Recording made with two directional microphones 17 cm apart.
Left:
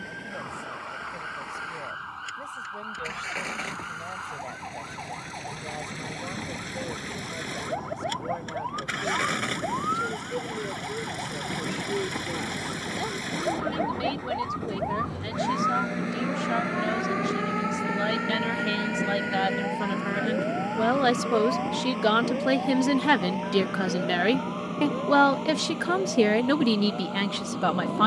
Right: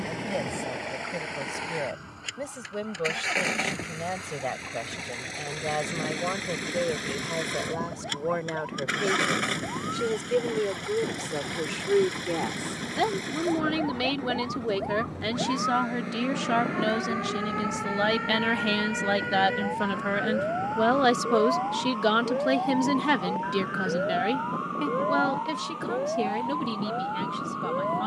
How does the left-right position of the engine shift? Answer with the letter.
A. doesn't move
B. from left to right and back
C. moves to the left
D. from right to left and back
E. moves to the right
C.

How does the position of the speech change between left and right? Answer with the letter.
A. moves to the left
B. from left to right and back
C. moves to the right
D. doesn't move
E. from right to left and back
A.